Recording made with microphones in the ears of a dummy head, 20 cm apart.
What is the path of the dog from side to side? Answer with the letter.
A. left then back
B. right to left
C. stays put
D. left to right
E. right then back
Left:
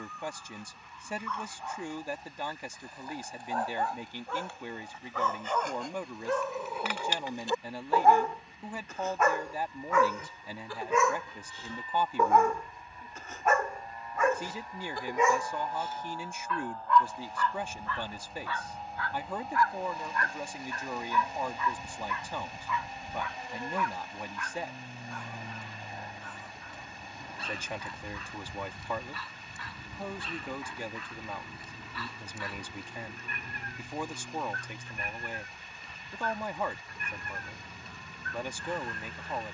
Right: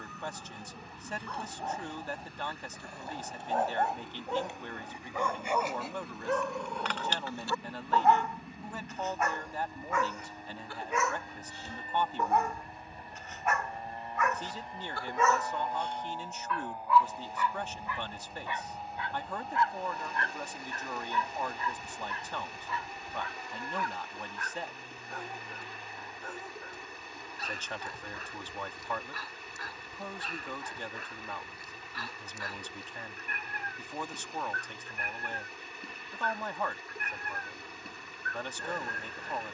A.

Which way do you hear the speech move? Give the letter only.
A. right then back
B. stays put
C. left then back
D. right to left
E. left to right
B.